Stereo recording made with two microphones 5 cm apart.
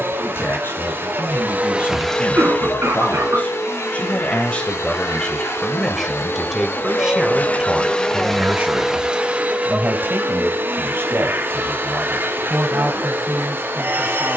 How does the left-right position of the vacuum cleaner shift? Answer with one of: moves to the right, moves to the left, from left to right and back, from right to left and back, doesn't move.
from right to left and back.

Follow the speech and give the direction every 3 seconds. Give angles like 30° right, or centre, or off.
50° left, 20° left, 20° right, 50° right, 60° right.